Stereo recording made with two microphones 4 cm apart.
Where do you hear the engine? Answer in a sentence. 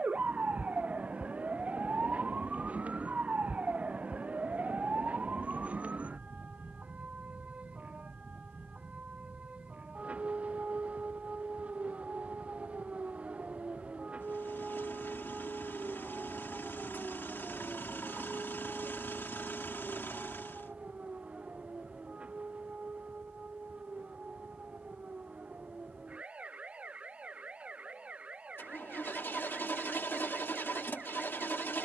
You can hear the engine on the left.